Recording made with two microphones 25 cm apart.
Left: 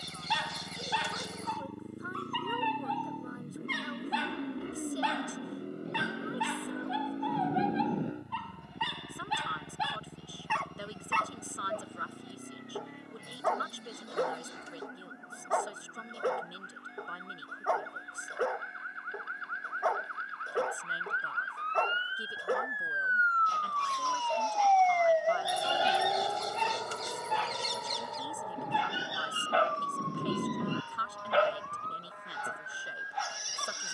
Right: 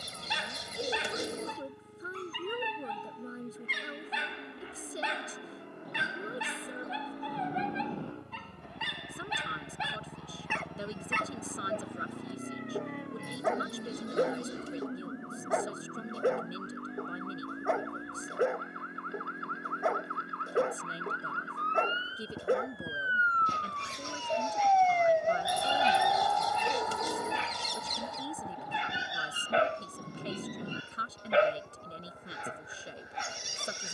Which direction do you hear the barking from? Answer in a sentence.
You can hear the barking on the right.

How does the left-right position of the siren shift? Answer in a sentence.
In this clip you hear the siren travel towards the left.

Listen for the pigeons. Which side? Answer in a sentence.
You can hear the pigeons on the right.